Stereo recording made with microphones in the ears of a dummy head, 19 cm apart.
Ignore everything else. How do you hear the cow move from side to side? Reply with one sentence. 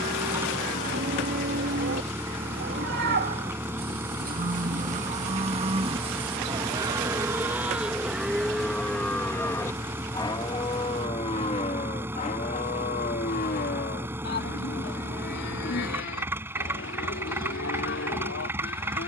In this clip you hear the cow move from right to left.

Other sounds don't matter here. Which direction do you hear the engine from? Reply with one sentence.
You can hear the engine in the centre.